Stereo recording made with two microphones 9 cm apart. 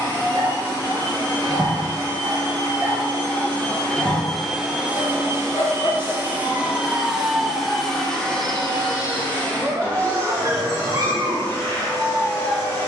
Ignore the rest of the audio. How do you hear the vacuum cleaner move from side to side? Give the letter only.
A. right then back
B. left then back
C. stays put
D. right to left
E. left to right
A.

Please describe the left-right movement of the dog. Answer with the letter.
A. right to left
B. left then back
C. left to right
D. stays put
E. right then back
B.